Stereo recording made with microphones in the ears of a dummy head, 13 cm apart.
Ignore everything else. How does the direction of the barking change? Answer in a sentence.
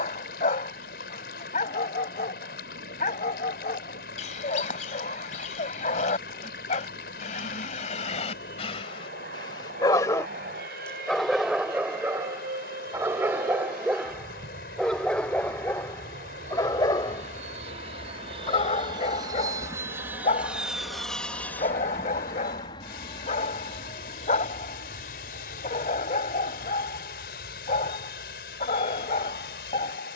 In this clip you hear the barking move from left to right and back again.